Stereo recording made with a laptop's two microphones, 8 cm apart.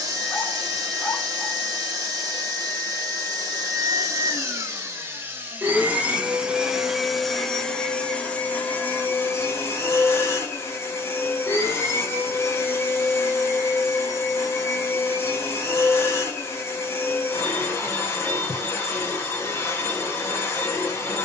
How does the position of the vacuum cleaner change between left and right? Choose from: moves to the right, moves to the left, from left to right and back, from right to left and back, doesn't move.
moves to the left.